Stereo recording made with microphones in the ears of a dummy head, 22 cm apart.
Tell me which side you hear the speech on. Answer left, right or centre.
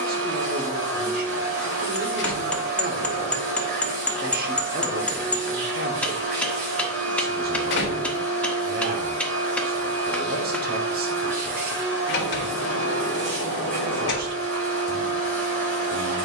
right.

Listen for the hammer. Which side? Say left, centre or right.
centre.